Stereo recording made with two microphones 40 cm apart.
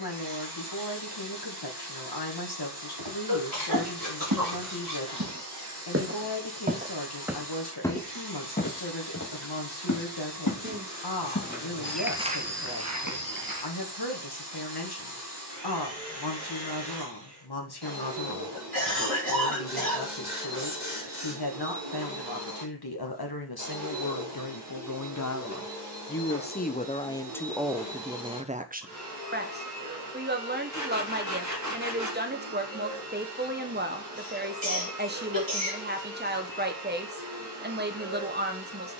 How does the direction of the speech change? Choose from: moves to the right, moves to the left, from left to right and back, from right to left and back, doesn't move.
moves to the right.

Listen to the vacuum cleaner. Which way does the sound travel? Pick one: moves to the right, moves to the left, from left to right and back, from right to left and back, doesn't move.
doesn't move.